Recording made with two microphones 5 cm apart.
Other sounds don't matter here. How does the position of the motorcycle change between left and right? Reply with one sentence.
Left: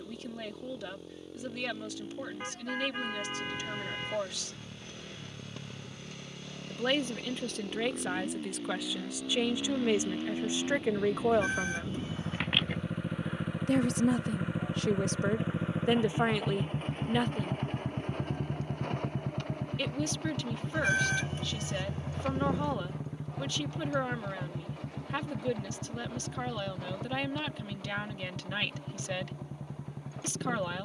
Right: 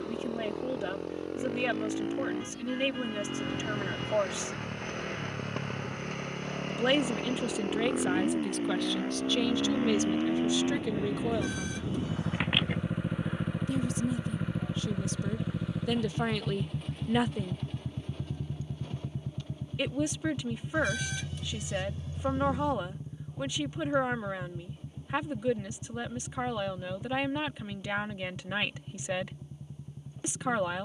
You can hear the motorcycle move to the left.